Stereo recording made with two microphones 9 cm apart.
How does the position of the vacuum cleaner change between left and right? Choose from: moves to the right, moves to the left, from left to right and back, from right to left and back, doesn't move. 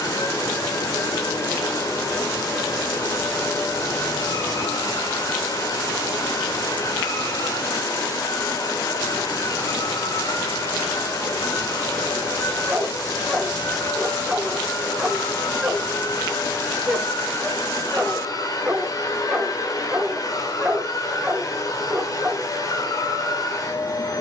doesn't move.